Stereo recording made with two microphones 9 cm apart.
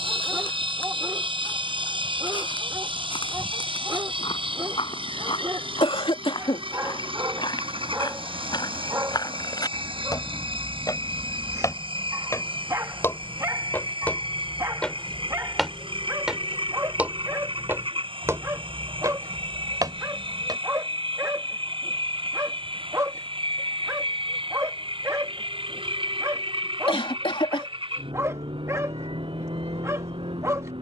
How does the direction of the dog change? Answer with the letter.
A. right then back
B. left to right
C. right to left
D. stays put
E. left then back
D.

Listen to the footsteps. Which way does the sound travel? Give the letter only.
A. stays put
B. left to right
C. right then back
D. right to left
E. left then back
B.